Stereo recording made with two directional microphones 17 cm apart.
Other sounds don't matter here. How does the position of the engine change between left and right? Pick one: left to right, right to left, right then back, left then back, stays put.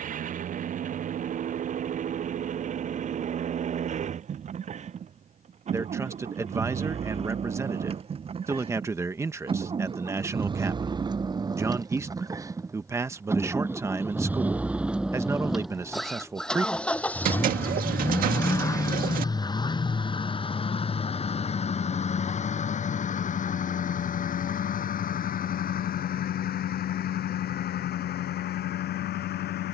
right to left.